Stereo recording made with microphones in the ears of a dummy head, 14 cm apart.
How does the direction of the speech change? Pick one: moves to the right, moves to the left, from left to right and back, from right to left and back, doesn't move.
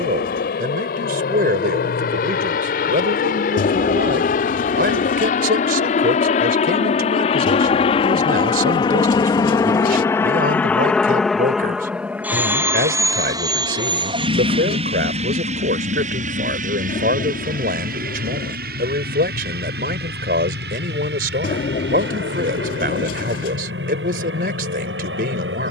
doesn't move.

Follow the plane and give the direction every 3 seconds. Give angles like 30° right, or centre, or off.
60° left, 50° left, 40° left, 10° left, 20° right, 50° right, 60° right, 70° right, 70° right.